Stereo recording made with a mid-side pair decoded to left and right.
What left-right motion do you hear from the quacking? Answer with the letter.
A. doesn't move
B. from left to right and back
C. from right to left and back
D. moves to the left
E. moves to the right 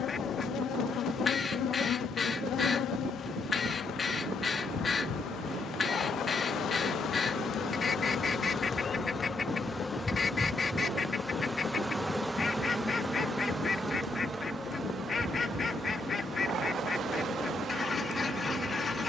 A.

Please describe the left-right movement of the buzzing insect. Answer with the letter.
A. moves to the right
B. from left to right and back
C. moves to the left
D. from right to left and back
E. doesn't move
A.